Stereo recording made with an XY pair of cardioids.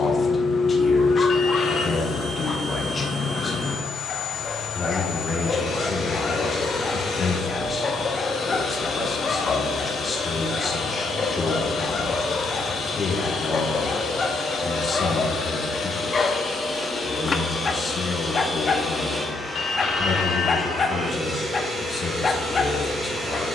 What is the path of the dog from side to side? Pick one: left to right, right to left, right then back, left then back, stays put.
stays put.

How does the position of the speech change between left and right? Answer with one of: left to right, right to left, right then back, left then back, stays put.
stays put.